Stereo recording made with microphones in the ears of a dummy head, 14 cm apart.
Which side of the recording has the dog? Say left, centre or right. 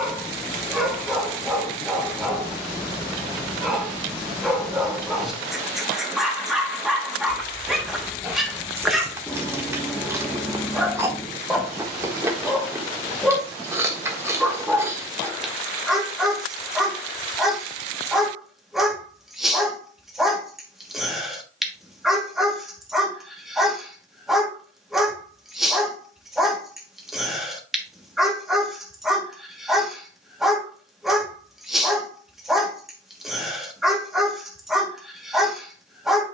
centre.